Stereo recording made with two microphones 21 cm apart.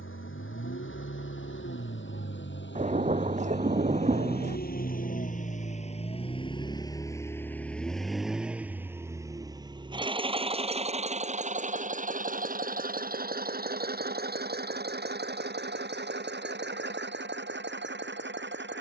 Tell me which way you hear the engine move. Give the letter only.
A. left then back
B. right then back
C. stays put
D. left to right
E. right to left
D.